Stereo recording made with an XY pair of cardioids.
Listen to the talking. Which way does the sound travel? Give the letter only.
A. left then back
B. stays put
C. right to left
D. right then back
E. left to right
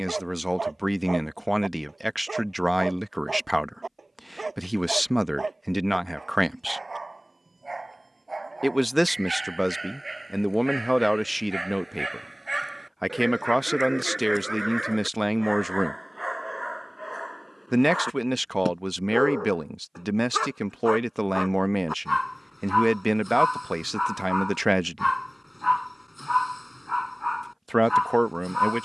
B.